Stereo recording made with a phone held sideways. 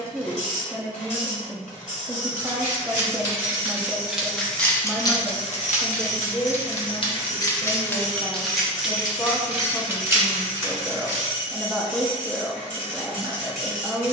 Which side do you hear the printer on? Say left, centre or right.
left.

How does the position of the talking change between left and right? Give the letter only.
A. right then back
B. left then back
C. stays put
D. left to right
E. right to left
B.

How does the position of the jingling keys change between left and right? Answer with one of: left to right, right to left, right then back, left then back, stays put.
left then back.